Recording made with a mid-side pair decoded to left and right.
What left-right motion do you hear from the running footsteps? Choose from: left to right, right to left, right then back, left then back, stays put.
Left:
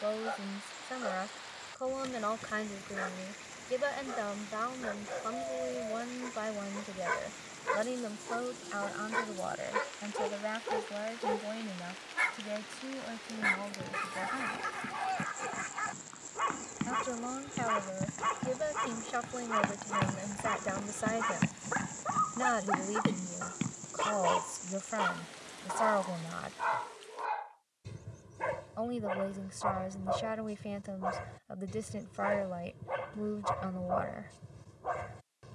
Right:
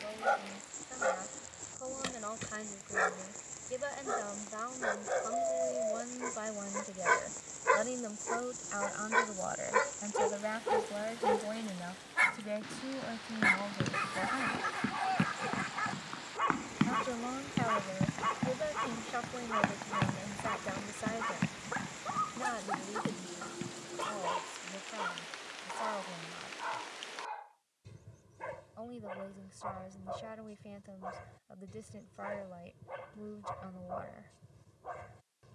right to left.